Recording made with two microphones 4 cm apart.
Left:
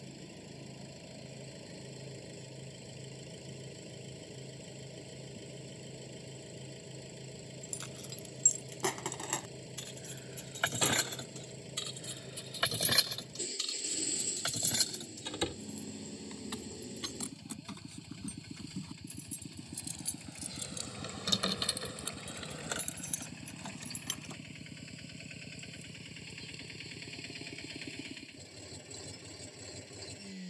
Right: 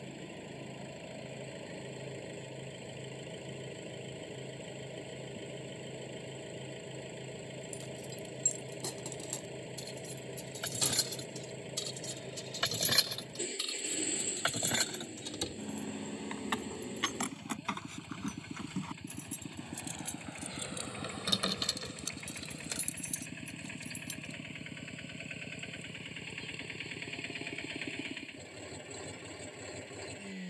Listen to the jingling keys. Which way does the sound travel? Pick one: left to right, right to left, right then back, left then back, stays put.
right then back.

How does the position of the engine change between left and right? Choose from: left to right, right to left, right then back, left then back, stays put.
stays put.